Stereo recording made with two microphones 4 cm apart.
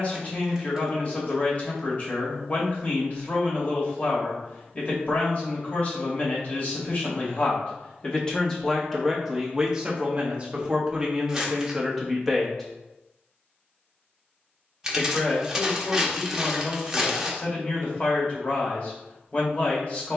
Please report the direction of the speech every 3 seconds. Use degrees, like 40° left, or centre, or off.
40° left, 40° left, 30° left, 10° right, centre, 30° left, 30° left.